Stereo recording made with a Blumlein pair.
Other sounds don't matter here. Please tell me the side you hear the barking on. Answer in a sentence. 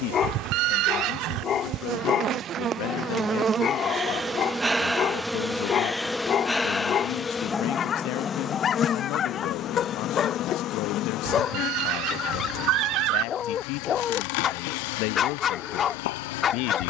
You can hear the barking on the left.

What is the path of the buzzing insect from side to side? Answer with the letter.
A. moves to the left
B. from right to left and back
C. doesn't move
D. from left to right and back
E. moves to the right
A.